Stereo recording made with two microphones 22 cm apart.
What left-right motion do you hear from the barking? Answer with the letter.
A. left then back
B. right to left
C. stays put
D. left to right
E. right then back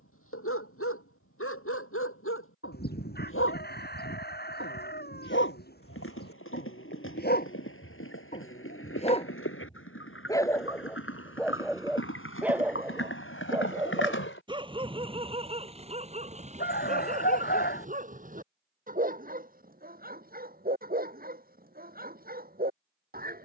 D.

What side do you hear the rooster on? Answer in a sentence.
You can hear the rooster on the left.